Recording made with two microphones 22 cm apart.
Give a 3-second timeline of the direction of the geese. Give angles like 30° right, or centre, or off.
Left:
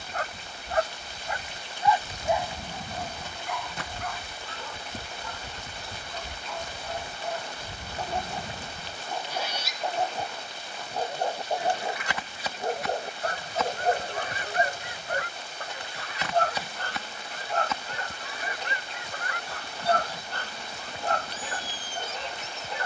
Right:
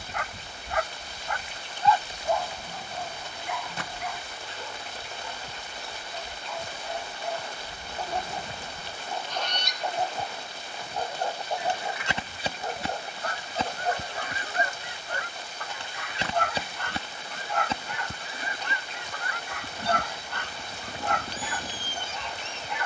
20° left, 60° left, 40° left, centre, 30° right, 30° right, 30° right, 30° right.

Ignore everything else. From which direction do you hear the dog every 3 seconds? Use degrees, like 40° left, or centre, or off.
20° left, centre, centre, 20° left, 40° left, 40° left, 40° left, 40° left.